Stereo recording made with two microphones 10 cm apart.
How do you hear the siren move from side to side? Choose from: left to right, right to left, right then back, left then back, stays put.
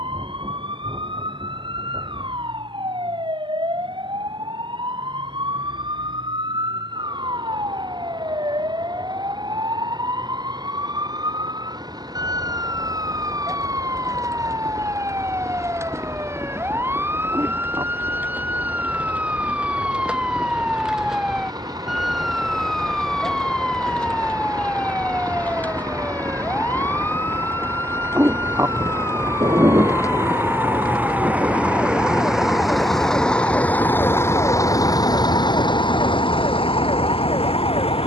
right to left.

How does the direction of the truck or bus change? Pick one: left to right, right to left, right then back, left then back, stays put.
right to left.